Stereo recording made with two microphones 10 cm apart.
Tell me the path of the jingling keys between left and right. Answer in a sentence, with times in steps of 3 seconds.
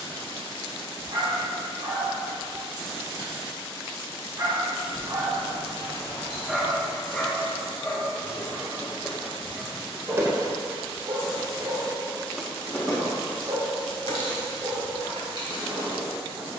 You can hear the jingling keys not at all from 0 s, on the left from 3 s, on the right from 9 s and on the left from 12 s.